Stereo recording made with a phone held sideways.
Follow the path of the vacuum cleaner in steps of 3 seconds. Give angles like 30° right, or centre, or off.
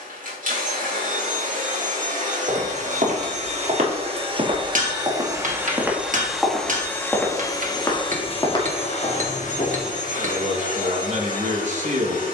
50° right, 30° right, 20° left, 50° left.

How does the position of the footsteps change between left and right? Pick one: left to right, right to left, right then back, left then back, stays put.
right to left.